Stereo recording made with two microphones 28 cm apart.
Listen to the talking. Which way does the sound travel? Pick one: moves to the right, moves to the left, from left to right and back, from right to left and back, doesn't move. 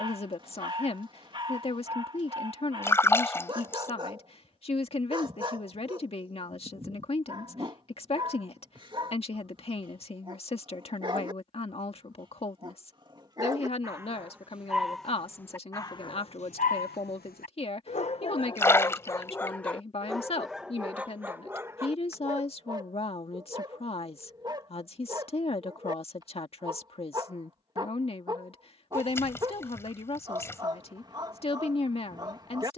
doesn't move.